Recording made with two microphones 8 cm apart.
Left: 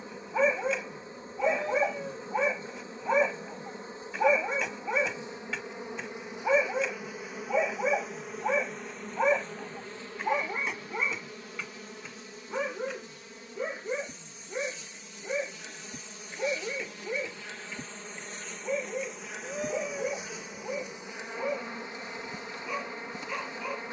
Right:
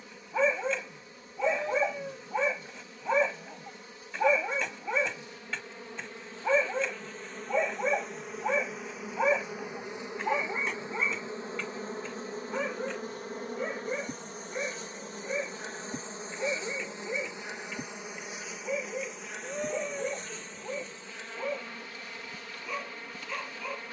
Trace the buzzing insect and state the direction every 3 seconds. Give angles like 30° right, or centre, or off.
30° left, 30° left, 10° left, 20° right, 50° right, 30° right, centre, 20° left.